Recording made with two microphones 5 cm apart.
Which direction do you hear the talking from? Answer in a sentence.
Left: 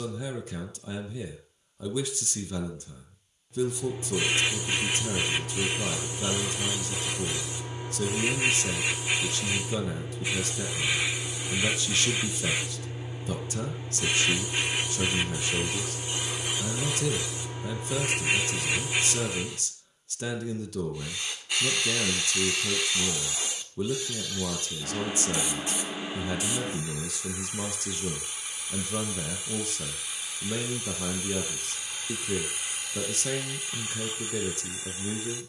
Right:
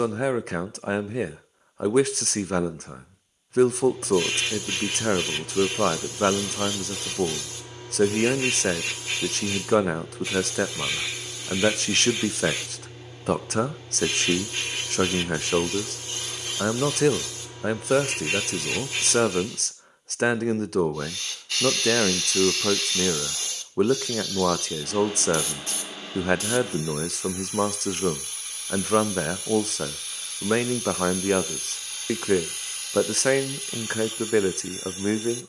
You can hear the talking on the right.